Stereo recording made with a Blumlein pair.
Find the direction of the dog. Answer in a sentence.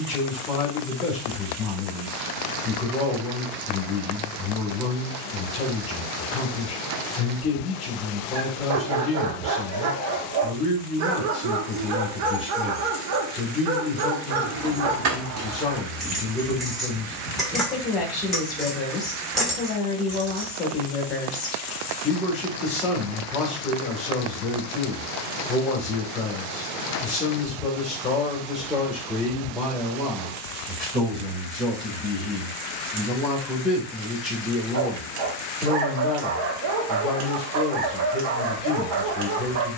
You can hear the dog on the right.